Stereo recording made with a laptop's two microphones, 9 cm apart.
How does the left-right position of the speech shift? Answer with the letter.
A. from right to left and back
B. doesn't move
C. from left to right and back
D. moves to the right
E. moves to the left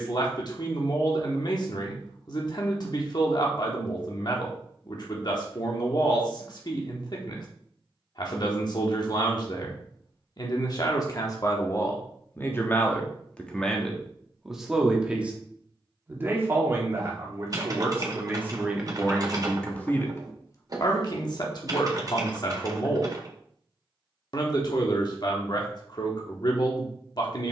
C.